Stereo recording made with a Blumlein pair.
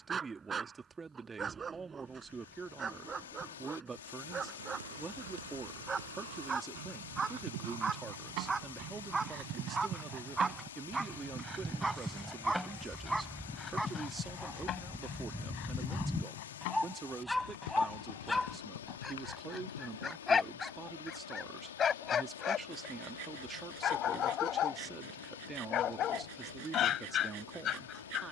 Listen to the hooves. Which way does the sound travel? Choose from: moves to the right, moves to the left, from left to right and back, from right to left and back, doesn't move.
moves to the left.